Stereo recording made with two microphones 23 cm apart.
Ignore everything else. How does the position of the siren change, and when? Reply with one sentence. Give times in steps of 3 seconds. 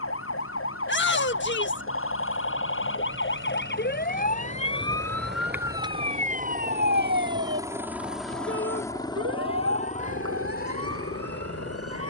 You can hear the siren on the left from 0 s and on the right from 6 s.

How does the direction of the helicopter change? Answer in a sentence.
In this clip you hear the helicopter move to the left.